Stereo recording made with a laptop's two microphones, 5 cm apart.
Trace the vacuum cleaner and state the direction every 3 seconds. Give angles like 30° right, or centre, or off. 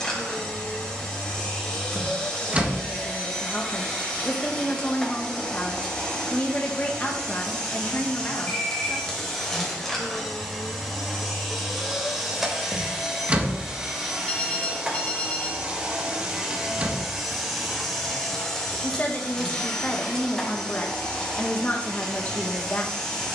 20° left, 20° left, 10° left, centre, 10° right, 10° right, 10° left, 10° left.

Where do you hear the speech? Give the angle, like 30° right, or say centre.
30° left.